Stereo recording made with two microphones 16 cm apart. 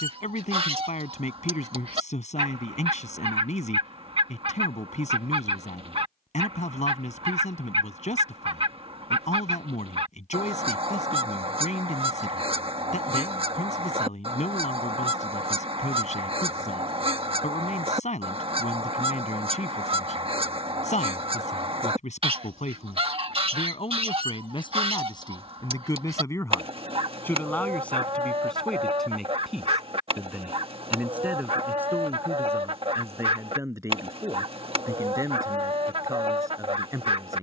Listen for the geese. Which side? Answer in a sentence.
You can hear the geese on the right.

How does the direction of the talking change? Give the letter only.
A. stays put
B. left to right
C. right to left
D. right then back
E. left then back
B.